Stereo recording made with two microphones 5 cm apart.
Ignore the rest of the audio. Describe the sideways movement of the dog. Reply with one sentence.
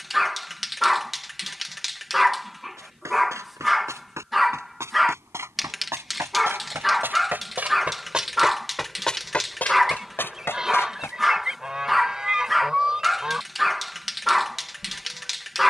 You can hear the dog stay put.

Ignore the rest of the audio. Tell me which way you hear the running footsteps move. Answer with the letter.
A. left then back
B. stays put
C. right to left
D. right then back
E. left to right
C.